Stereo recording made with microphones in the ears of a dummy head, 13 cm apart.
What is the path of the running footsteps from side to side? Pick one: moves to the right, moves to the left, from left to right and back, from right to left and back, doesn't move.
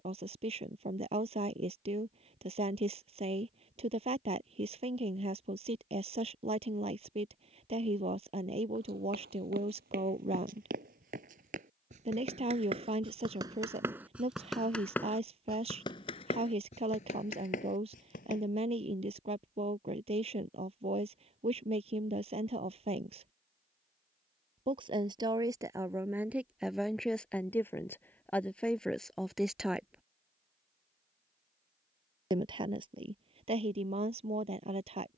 moves to the left.